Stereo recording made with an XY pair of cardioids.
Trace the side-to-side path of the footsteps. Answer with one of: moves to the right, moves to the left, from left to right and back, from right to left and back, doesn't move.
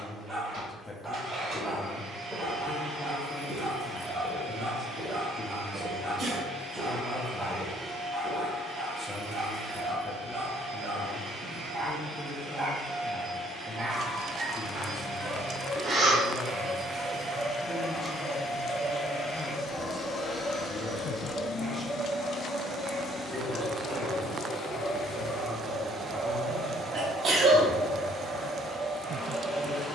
from left to right and back.